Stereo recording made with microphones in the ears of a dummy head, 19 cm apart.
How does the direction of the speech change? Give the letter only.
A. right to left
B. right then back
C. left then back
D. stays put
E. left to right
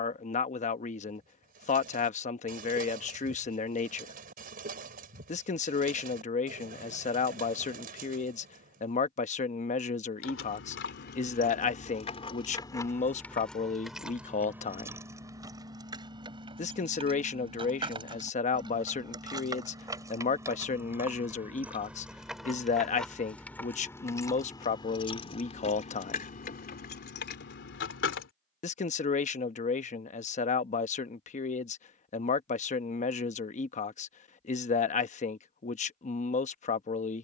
D.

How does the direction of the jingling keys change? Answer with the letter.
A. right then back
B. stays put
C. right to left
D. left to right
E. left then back
A.